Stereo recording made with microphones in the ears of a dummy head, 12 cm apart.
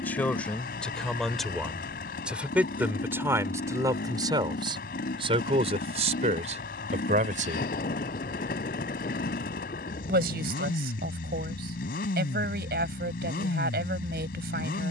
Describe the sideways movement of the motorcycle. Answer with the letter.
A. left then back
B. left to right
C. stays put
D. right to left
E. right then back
C.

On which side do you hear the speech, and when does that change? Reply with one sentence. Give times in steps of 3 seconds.
In this clip you hear the speech in the centre from 0 s and on the right from 3 s.